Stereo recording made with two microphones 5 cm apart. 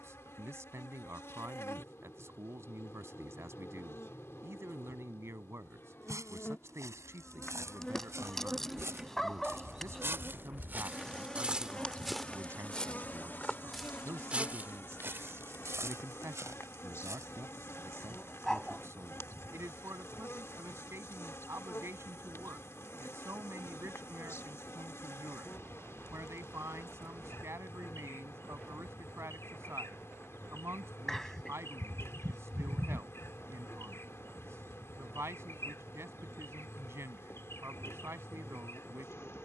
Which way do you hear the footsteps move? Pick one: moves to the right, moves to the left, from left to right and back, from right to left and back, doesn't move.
from right to left and back.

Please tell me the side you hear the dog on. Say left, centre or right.
centre.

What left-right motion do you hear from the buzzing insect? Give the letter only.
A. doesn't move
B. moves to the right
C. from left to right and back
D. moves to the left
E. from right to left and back
C.